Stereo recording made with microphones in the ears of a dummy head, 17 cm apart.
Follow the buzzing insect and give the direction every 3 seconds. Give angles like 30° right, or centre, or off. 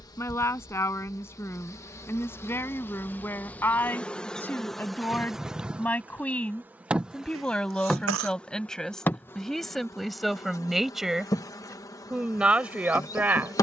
20° left, centre, centre, 20° left, 20° left.